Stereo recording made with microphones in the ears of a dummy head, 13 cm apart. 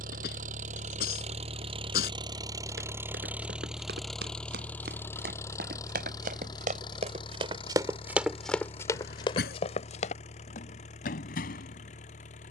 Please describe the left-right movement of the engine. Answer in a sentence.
In this clip you hear the engine go from the right side to the left.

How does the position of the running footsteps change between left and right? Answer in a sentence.
In this clip you hear the running footsteps move from right to left.